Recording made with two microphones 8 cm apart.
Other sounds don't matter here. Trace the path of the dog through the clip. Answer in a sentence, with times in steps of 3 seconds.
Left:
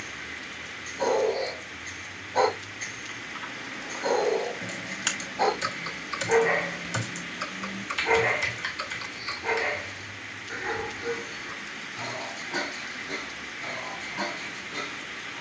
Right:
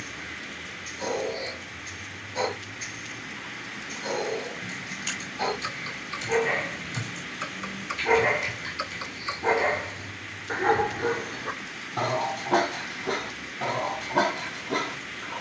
You can hear the dog on the left from 0 s, in the centre from 6 s and on the right from 9 s.